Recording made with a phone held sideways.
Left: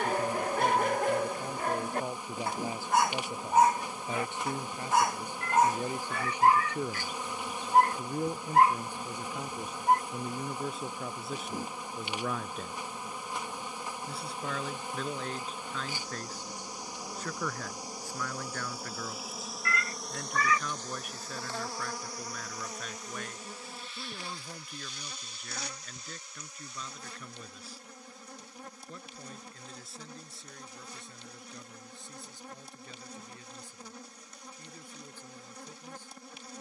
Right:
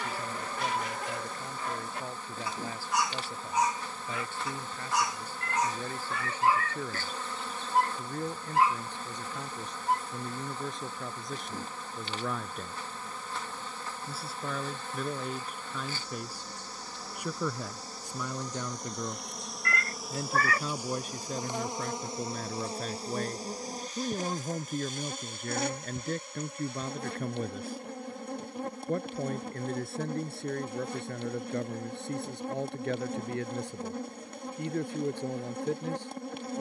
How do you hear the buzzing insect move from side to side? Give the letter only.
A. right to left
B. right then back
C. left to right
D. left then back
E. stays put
C.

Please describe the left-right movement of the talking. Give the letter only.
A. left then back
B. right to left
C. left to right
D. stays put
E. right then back
C.